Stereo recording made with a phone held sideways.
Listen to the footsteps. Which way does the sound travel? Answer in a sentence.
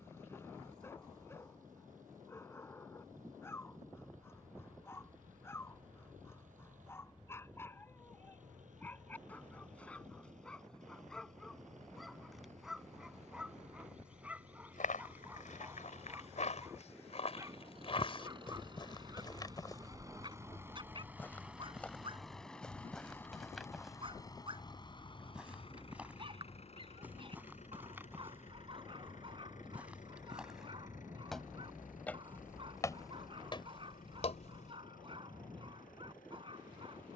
You can hear the footsteps go right and come back.